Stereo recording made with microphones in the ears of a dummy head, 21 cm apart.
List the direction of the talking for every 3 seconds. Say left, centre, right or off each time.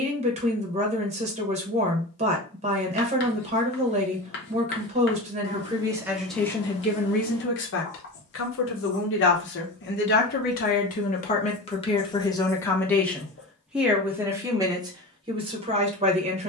right, right, left, left, centre, right.